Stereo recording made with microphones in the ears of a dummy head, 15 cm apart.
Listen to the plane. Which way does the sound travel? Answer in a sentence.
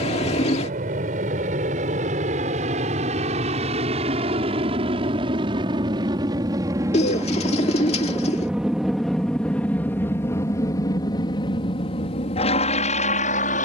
You can hear the plane travel towards the left.